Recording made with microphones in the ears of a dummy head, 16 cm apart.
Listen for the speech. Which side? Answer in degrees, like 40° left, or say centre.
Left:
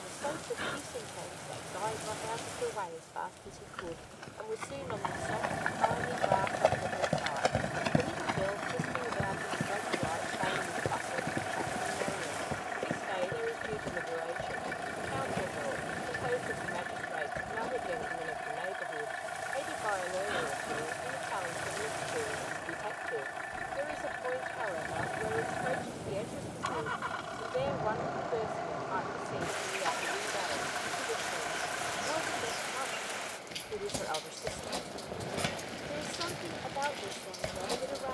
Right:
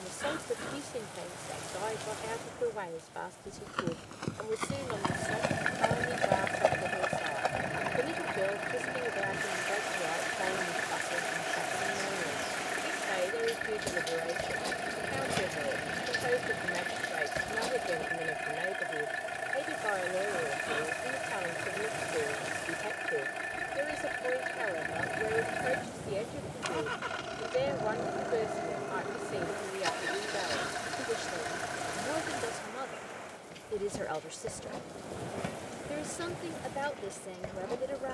20° right.